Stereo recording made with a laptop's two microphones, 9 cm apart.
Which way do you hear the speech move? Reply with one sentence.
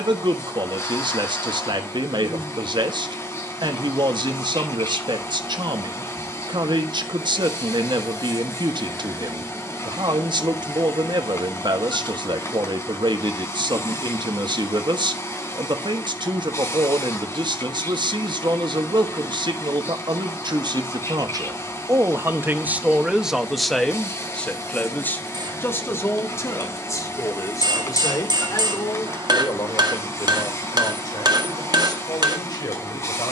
In this clip you hear the speech travel towards the left.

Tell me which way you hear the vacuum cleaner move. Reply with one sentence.
You can hear the vacuum cleaner stay in one place.